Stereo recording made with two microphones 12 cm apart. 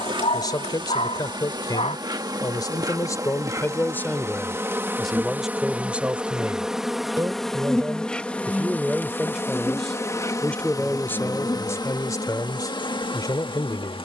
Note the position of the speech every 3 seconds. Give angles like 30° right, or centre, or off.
40° left, 10° left, 20° right, 10° left, 30° left.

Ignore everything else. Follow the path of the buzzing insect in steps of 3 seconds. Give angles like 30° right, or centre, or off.
40° right, 20° right, centre, 30° left, 50° left.